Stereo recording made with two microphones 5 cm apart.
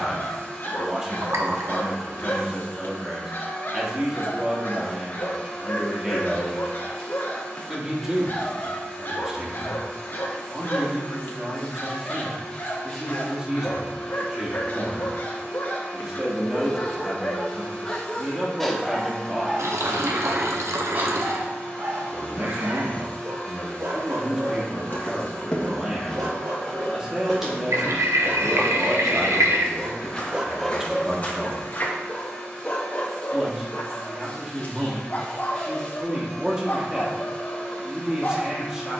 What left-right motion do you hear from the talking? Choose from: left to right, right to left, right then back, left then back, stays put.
stays put.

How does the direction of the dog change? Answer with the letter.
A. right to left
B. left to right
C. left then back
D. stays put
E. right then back
E.